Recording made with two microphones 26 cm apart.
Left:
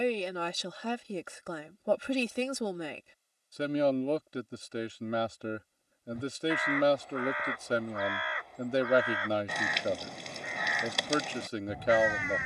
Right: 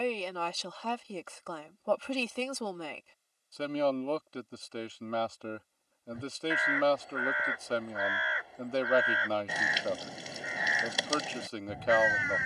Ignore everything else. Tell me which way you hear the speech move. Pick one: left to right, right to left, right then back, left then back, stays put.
stays put.